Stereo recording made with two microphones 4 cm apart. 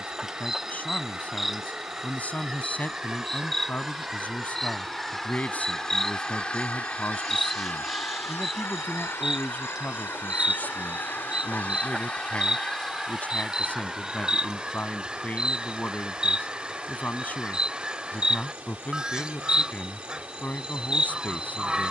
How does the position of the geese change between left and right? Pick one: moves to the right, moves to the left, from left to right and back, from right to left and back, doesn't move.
from right to left and back.